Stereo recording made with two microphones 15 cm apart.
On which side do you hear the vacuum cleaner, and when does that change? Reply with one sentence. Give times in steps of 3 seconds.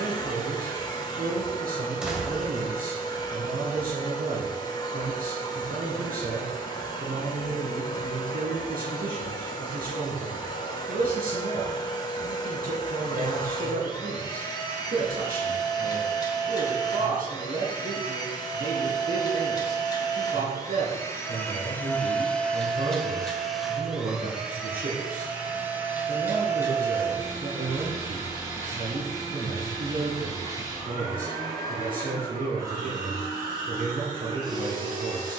You can hear the vacuum cleaner on the left from 0 s, in the centre from 21 s and on the right from 27 s.